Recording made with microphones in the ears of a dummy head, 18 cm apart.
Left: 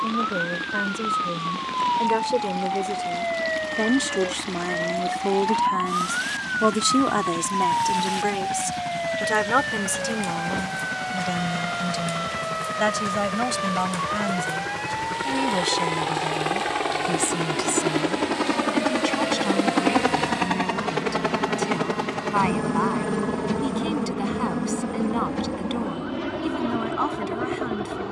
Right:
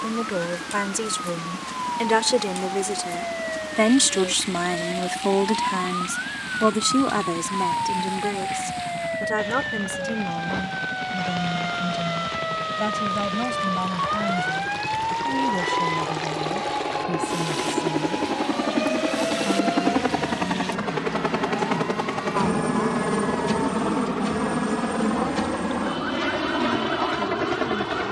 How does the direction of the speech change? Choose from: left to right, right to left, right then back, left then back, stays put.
right to left.